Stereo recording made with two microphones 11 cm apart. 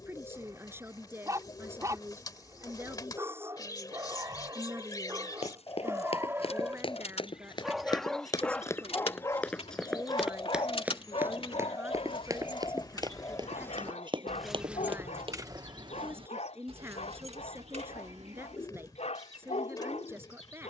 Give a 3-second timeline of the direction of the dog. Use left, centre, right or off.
right, right, centre, left, left, left, left.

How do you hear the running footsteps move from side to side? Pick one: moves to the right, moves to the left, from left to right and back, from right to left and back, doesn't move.
moves to the right.